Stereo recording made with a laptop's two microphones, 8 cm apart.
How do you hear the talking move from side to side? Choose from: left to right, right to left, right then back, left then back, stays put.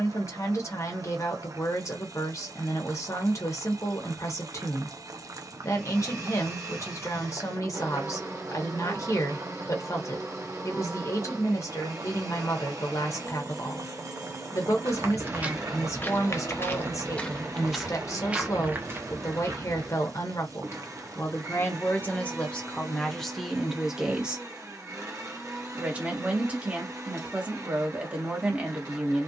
left to right.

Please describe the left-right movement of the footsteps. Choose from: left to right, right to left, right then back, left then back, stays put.
left then back.